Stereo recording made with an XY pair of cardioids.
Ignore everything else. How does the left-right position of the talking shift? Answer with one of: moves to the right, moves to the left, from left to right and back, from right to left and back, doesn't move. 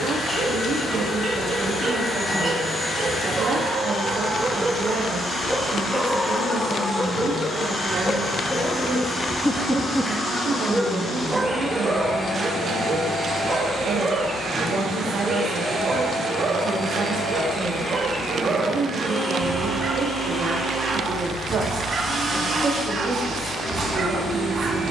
doesn't move.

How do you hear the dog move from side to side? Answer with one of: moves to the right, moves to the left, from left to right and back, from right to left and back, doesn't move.
from right to left and back.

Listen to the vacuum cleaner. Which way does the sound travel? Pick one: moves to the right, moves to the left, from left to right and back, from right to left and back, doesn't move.
moves to the right.